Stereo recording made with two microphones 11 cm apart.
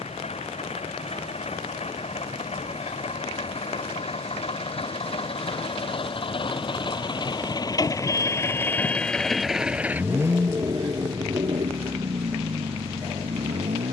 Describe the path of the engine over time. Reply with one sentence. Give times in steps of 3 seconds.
In this clip you hear the engine on the left from 0 s and on the right from 9 s.